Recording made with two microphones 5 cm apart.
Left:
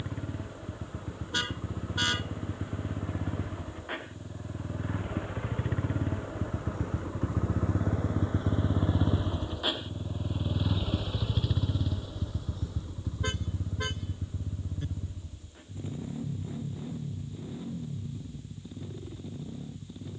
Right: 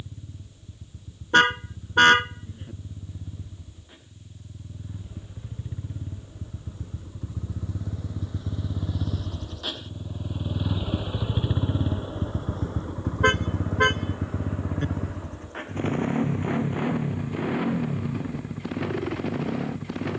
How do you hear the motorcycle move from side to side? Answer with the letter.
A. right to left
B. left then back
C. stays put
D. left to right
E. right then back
D.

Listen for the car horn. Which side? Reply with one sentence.
You can hear the car horn on the right.